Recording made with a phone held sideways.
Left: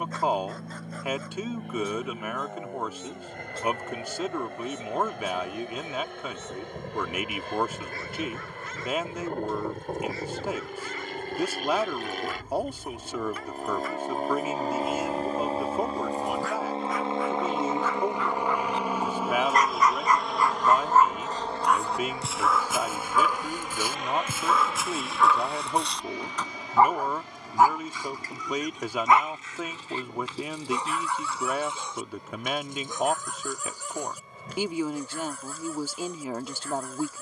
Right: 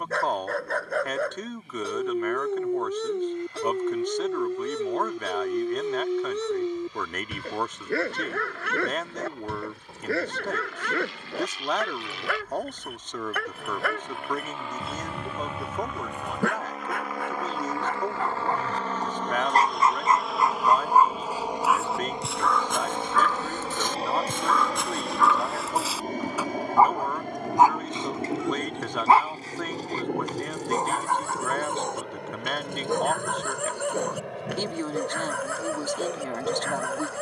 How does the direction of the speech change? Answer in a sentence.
In this clip you hear the speech stay in one place.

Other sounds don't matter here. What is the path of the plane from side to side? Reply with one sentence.
In this clip you hear the plane go from the left side to the right.